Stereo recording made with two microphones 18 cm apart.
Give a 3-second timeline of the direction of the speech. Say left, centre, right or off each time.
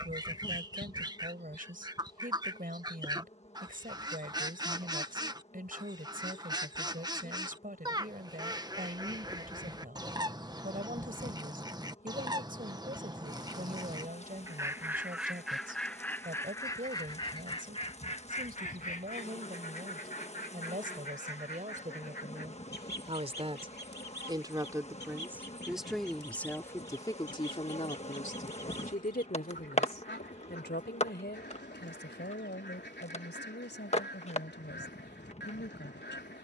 right, right, right, right, right, right, right, right, centre, left, left, left.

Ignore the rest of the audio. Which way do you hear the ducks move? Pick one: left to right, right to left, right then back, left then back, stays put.
right to left.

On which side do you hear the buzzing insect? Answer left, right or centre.
left.